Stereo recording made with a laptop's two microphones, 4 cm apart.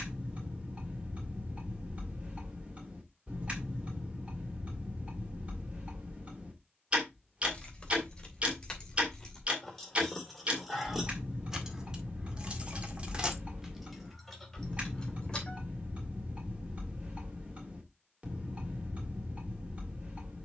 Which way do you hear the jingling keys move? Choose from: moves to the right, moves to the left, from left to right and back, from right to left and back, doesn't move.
from left to right and back.